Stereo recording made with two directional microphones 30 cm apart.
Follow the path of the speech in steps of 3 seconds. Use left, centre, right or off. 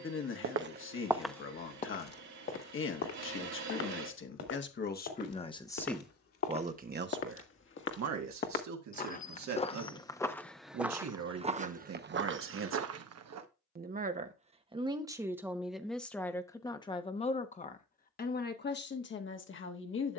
left, left, right, right, right, centre, left.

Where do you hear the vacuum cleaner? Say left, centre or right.
right.